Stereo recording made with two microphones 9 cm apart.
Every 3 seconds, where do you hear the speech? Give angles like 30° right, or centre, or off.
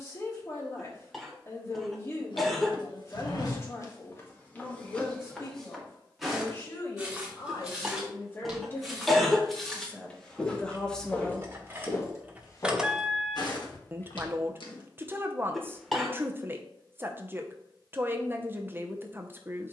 30° left, 30° left, 30° left, 10° left, 30° right, 30° right, 30° right.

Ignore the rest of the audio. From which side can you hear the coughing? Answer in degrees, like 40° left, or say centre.
centre.